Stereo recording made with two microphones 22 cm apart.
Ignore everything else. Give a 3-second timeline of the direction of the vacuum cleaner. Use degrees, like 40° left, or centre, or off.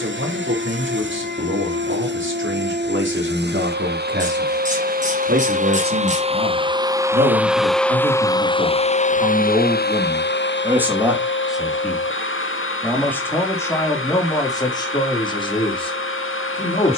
60° right, 50° right, centre, 60° left, 80° left, 80° left.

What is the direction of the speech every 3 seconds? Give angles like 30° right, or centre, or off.
70° right, 60° right, 40° right, 10° right, 10° left, 20° left.